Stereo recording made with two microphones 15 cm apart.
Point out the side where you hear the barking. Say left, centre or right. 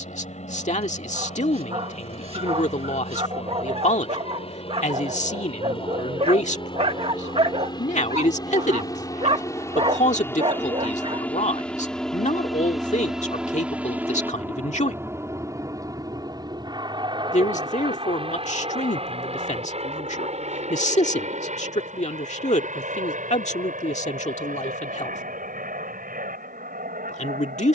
right.